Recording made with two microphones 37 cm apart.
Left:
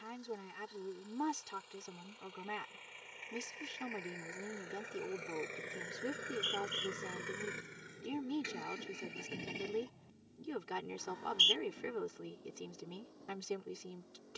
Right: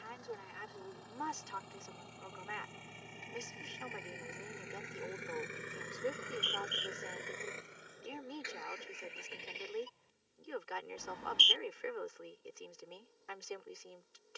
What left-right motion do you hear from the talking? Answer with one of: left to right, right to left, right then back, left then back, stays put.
stays put.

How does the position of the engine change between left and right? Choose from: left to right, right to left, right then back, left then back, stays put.
right to left.